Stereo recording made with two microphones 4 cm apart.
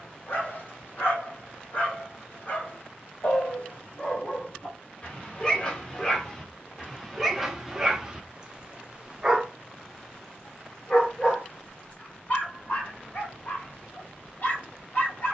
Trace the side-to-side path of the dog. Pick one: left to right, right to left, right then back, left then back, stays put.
right then back.